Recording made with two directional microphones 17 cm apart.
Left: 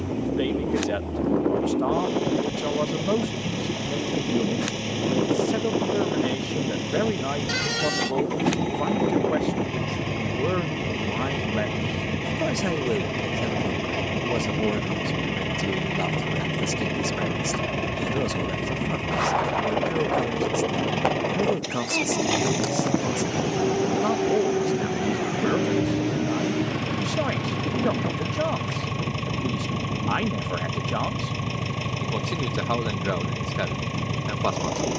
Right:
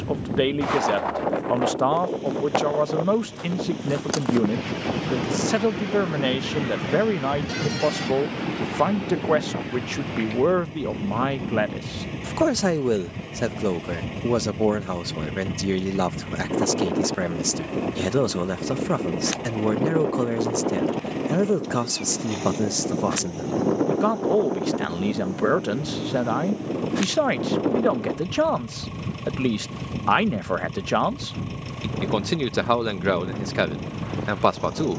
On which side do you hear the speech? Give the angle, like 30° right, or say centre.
30° right.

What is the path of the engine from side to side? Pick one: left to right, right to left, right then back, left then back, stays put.
stays put.